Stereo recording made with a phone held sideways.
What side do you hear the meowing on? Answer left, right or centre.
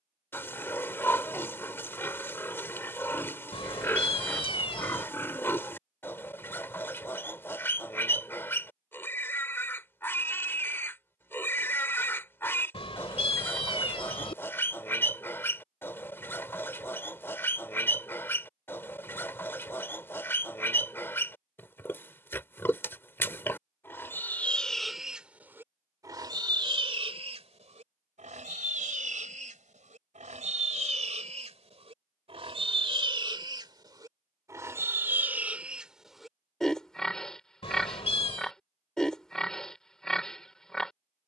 left.